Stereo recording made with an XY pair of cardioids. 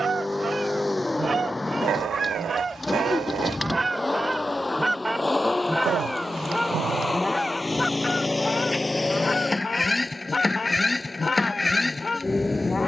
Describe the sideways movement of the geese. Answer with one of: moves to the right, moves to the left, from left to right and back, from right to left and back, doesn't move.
moves to the left.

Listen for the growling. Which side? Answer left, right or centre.
right.